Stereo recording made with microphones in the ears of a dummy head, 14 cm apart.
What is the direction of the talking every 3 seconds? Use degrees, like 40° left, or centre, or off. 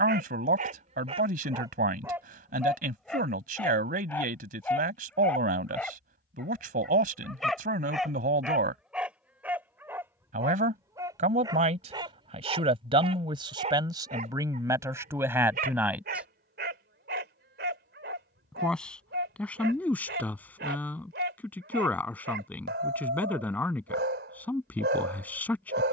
60° right, 60° right, 60° right, 50° right, 30° right, 10° right, 10° left, 10° left, 10° left.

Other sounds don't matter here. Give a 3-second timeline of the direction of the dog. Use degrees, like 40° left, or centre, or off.
30° right, 10° left, centre, 20° right, 40° right, 70° right, 70° right, 70° right, 70° right.